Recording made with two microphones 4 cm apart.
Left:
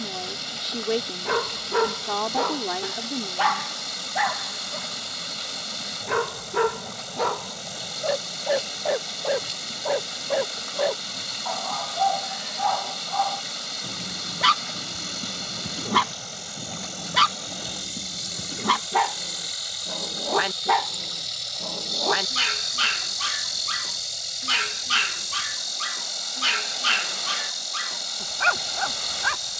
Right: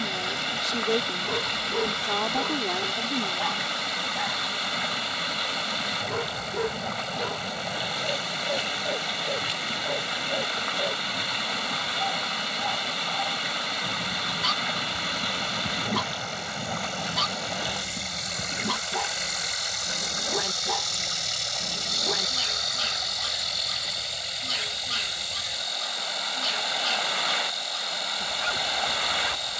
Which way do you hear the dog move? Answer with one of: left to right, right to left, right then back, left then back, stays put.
stays put.